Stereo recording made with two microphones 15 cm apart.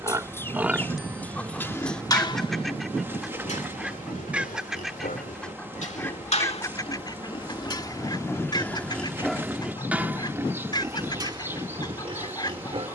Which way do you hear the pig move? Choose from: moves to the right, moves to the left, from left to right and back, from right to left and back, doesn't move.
from right to left and back.